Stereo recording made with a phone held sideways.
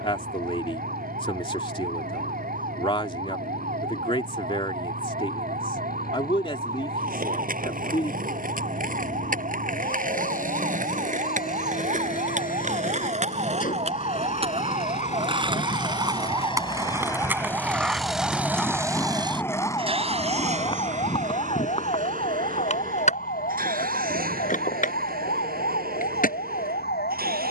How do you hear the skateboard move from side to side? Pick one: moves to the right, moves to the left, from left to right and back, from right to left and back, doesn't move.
moves to the left.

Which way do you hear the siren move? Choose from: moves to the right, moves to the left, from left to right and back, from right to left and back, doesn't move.
moves to the left.